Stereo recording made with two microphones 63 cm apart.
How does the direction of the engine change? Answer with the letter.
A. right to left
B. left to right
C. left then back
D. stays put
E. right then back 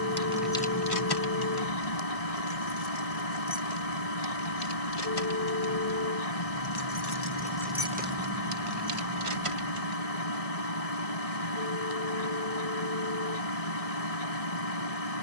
D.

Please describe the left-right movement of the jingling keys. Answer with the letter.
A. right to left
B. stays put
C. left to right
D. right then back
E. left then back
E.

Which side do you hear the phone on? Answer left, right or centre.
left.